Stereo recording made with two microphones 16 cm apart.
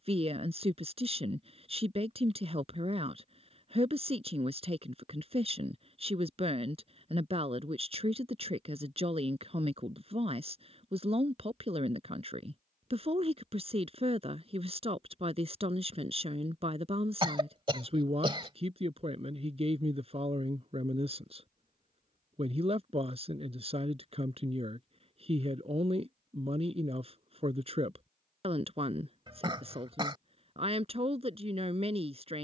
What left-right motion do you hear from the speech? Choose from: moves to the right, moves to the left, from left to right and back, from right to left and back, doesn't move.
doesn't move.